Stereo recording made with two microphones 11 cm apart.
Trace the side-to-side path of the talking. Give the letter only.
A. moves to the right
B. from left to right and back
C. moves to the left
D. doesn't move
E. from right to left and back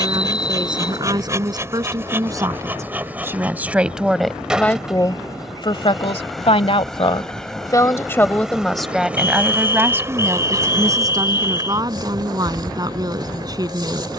E.